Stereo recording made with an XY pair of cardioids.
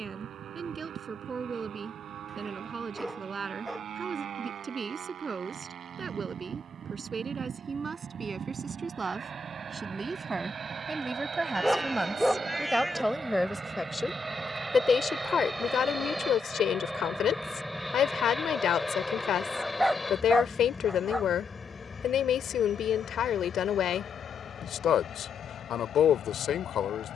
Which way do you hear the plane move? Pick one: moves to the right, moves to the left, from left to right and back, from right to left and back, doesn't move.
moves to the left.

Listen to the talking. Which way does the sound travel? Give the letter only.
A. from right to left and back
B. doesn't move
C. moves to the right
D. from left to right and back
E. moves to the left
E.